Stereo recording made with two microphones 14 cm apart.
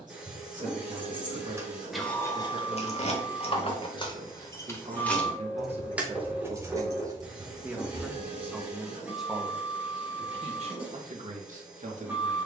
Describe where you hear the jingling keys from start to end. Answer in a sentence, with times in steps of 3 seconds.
You can hear the jingling keys in the centre from 0 s, on the left from 3 s, on the right from 6 s and not at all from 9 s.